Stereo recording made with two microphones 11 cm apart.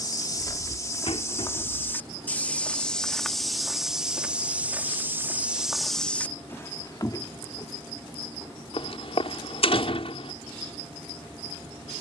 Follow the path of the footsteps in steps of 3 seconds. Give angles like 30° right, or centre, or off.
20° left, 10° right, 30° left, off.